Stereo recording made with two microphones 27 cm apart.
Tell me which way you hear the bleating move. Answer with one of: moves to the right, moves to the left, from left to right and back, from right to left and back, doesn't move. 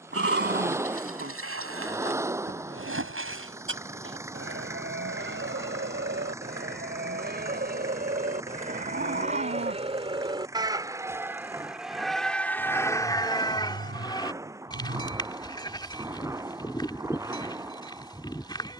moves to the left.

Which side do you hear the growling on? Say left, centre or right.
right.